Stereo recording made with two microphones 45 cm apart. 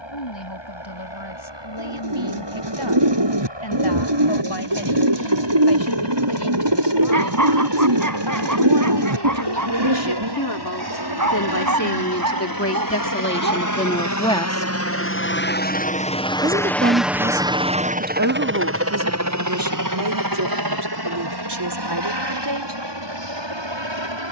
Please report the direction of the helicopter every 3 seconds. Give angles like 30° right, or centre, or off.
70° left, 70° left, 70° left, 60° left, 40° left, 10° left, 40° right, 60° right.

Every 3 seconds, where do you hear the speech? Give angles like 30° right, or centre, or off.
70° left, 70° left, 60° left, 50° left, 20° left, 20° right, 50° right, 60° right.